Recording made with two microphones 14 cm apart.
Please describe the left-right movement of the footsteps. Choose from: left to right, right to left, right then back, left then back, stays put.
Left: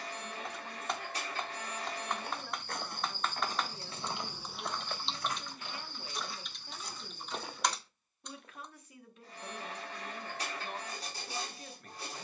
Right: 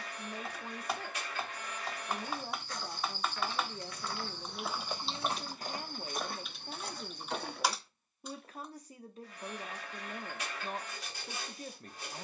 left to right.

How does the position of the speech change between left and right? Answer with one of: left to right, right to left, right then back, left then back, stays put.
stays put.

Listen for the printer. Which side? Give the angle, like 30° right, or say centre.
40° left.